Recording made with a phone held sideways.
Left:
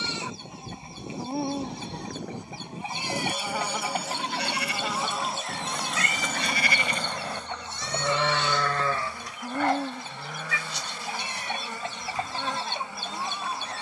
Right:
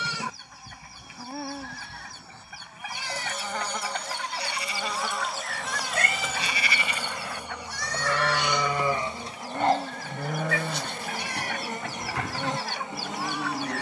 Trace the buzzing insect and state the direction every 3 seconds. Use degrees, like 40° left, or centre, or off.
20° left, centre, 10° right, 20° right, 20° right.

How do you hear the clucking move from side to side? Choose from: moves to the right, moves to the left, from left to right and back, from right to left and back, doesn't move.
doesn't move.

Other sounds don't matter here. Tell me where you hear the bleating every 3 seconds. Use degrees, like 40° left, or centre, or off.
80° left, 70° left, 30° left, 50° right, 70° right.